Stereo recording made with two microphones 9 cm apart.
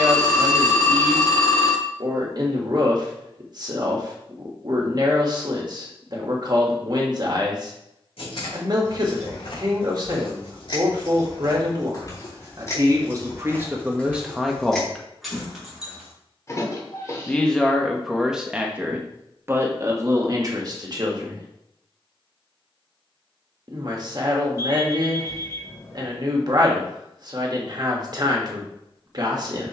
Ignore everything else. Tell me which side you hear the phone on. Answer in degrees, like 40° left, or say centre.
30° left.